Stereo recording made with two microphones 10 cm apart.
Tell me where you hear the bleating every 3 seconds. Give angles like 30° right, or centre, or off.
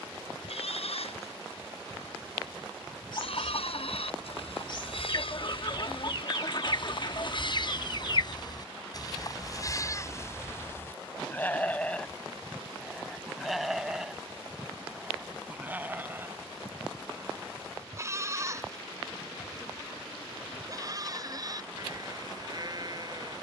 80° left, 70° left, 50° left, 30° left, centre, 20° right, 30° right, 40° right.